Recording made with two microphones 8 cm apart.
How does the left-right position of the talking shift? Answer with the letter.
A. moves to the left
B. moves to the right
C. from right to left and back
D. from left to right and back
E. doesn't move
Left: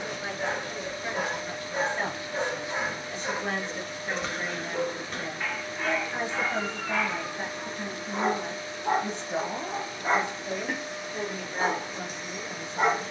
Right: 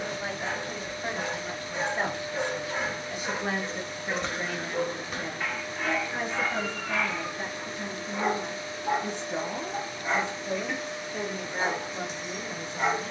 C.